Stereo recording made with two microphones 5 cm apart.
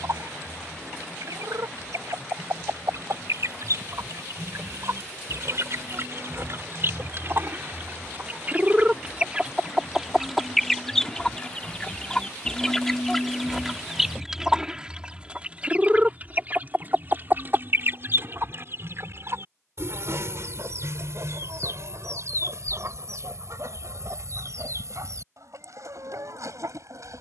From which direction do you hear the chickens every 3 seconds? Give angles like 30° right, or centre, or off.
80° right, 70° right, 40° right, centre, centre, 30° right, 50° right, 70° right, 70° right.